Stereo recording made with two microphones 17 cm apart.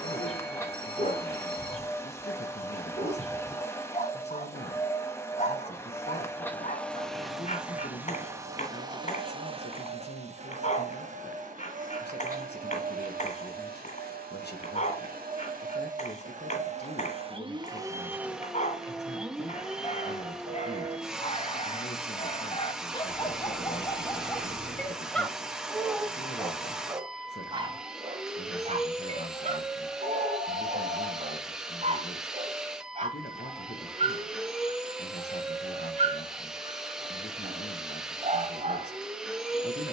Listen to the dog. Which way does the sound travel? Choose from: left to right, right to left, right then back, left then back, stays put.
left to right.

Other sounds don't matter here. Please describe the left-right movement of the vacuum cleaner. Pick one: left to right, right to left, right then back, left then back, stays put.
right then back.